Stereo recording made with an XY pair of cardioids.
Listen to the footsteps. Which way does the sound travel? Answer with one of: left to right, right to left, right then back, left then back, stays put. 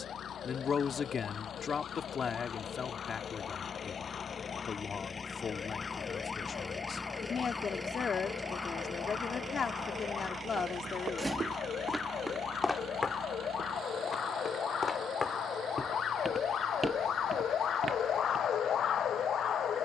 left then back.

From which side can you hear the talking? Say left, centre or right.
left.